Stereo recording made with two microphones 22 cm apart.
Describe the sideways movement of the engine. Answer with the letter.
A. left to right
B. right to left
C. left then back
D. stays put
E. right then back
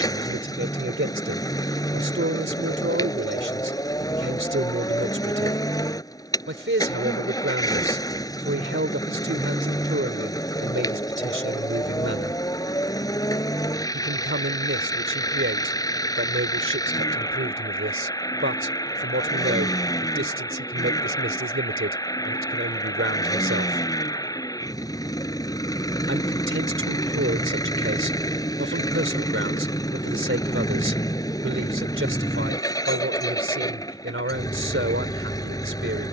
D.